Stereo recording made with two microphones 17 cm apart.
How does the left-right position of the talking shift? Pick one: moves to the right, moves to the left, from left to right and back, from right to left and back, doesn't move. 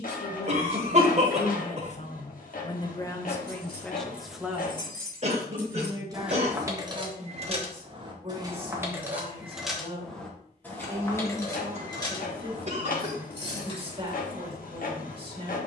moves to the right.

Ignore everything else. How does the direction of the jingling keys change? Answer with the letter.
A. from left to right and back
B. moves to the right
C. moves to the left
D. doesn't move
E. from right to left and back
A.